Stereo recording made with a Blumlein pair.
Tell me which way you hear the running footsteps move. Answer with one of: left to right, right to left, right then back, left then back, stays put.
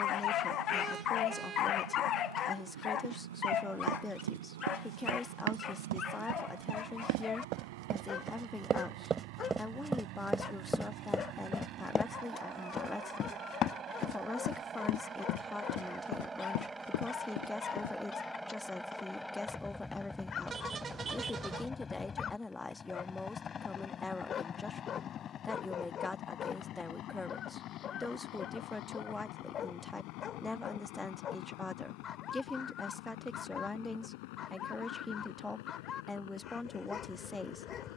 right to left.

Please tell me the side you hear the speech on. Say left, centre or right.
centre.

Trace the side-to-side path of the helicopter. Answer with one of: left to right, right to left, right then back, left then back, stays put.
right to left.